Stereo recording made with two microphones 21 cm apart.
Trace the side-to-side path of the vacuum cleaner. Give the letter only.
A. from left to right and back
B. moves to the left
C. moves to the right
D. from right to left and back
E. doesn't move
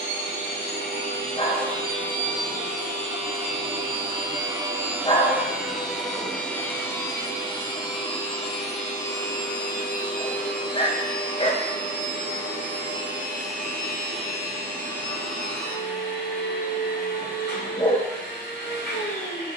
B.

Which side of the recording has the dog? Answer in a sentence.
In this clip you hear the dog on the left.